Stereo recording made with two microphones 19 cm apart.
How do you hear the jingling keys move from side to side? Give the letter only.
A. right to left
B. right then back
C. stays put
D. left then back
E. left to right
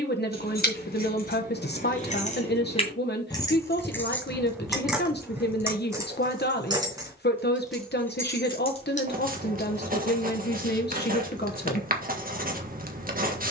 B.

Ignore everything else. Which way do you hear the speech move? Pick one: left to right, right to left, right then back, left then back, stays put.
stays put.